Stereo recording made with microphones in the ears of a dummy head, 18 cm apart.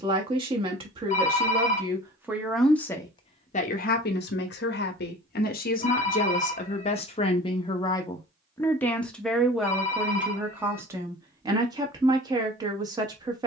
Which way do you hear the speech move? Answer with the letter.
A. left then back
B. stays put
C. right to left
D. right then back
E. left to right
A.